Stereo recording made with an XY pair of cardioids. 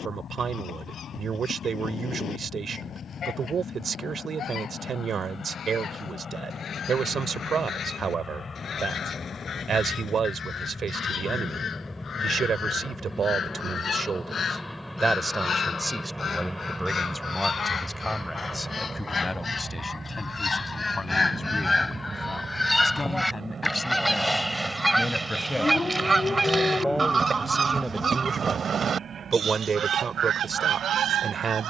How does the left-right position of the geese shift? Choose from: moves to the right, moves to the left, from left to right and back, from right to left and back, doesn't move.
moves to the right.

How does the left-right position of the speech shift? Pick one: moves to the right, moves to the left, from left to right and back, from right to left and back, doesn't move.
from right to left and back.